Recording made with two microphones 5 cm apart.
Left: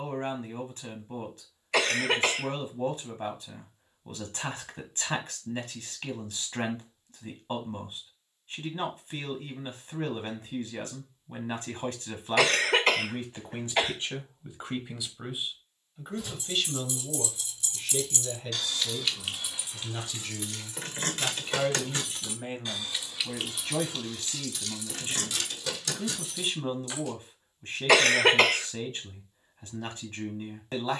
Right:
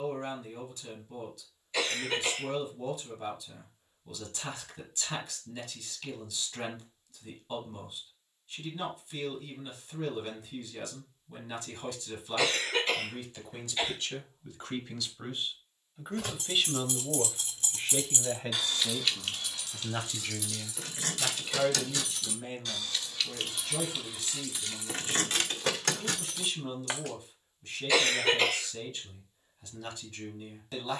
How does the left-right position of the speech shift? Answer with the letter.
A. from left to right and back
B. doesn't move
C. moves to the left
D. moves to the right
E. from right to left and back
A.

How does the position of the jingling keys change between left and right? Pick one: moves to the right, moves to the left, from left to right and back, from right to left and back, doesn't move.
from right to left and back.